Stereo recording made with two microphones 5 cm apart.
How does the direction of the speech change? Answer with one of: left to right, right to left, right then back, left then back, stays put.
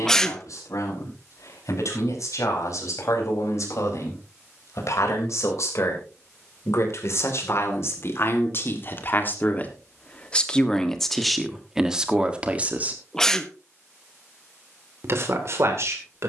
left to right.